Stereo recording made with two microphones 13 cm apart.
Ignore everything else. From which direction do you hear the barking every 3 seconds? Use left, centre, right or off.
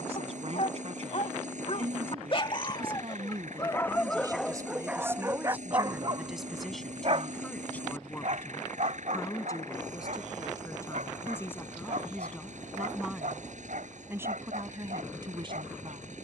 left, centre, right, right, right, right.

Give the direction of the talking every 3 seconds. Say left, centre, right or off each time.
right, right, centre, left, centre, right.